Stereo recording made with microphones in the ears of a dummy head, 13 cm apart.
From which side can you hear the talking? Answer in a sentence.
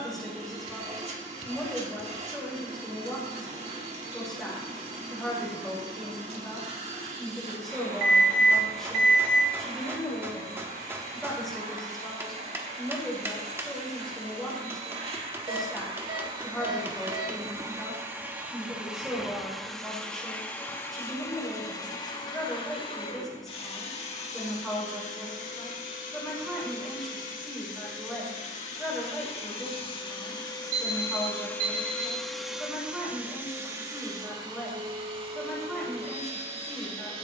In this clip you hear the talking in the centre.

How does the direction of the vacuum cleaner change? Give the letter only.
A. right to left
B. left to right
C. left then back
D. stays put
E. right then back
C.